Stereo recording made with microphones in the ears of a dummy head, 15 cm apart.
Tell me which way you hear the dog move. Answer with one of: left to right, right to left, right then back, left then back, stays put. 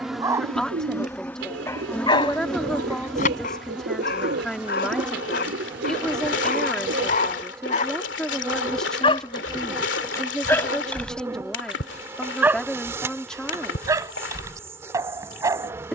left then back.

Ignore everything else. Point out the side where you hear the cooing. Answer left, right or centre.
right.